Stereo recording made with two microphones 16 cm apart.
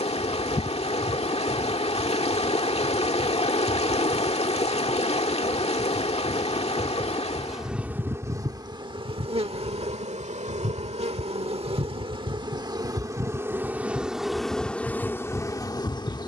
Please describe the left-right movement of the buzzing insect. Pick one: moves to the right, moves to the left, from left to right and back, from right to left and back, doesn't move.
from left to right and back.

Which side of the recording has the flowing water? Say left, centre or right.
left.